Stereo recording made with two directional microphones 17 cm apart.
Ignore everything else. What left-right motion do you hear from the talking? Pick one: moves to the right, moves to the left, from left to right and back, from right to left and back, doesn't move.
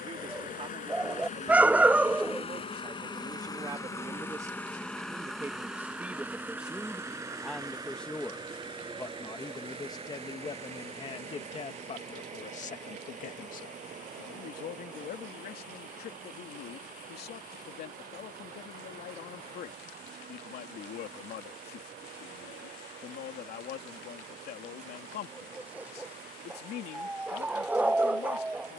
moves to the left.